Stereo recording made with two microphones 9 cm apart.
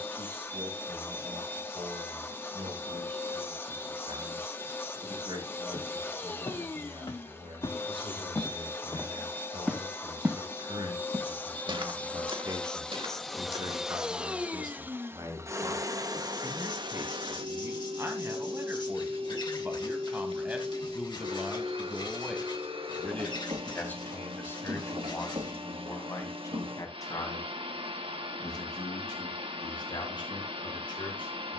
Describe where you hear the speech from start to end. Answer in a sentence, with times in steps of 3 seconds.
In this clip you hear the speech on the right from 0 s, in the centre from 21 s and on the left from 24 s.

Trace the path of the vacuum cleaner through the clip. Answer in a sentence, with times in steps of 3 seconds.
In this clip you hear the vacuum cleaner on the left from 0 s, in the centre from 12 s and on the right from 15 s.